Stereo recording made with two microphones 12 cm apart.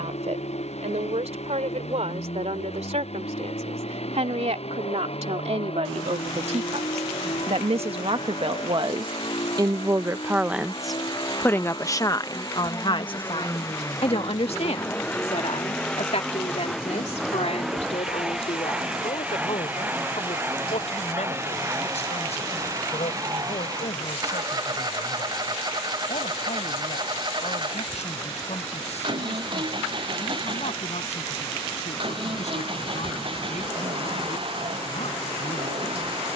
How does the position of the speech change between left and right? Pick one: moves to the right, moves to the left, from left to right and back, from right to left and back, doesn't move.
moves to the left.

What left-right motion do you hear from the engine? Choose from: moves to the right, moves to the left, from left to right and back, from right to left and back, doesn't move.
moves to the right.